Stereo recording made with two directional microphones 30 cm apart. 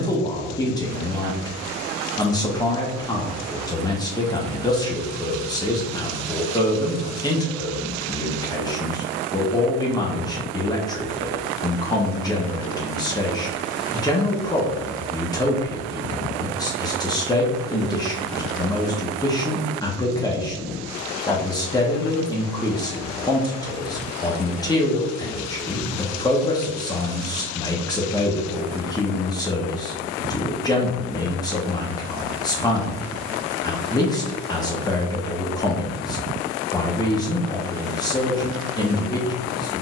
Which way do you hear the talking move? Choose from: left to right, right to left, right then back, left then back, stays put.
stays put.